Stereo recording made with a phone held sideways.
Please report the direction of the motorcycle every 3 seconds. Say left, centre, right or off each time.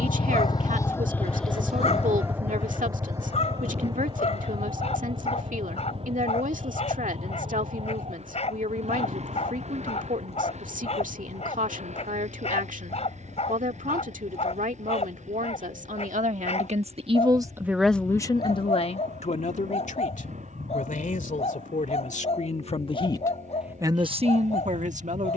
centre, right, right, right, right, right, right, right, right.